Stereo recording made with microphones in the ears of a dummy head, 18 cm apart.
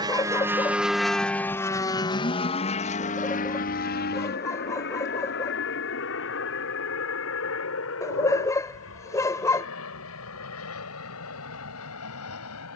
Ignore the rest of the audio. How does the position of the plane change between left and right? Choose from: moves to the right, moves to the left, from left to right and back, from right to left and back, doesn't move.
moves to the left.